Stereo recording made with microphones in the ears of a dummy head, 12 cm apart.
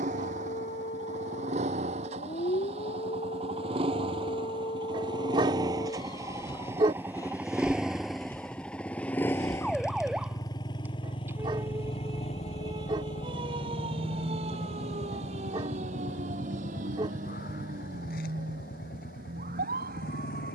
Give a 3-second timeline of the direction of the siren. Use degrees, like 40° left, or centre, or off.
50° left, 40° left, 20° left, 10° right, 40° right, 60° right, 70° right.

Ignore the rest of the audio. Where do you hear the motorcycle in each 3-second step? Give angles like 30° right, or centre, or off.
50° right, 40° right, 10° right, 30° left, 50° left, 70° left, 70° left.